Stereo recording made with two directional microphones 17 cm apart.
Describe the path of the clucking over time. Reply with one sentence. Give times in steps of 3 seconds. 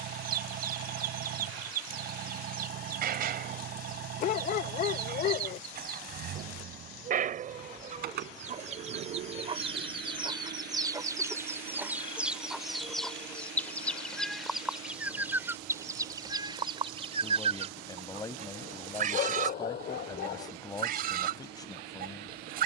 You can hear the clucking on the right from 0 s, in the centre from 12 s and on the right from 15 s.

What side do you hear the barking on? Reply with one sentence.
You can hear the barking on the left.